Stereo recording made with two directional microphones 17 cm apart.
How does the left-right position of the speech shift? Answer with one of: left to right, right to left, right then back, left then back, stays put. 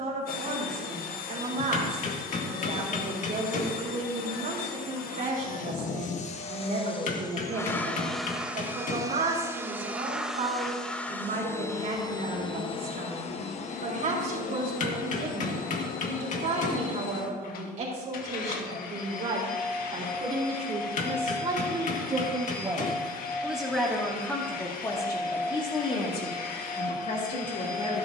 right to left.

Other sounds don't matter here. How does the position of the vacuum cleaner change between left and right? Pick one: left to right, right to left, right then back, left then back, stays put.
right then back.